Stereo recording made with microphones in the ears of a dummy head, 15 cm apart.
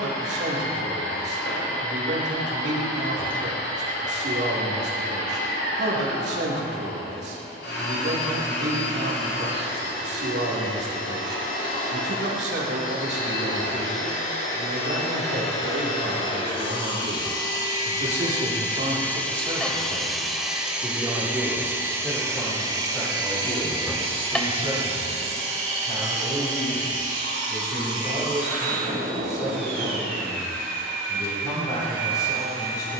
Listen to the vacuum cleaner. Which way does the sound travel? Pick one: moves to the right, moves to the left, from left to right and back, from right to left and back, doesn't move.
moves to the right.